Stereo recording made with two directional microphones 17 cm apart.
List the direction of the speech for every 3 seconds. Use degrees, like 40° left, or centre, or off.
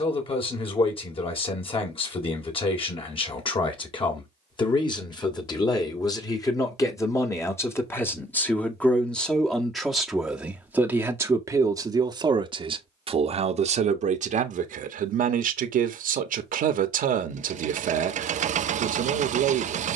30° left, 30° left, 20° left, 10° right, 40° right, 50° right, 50° right.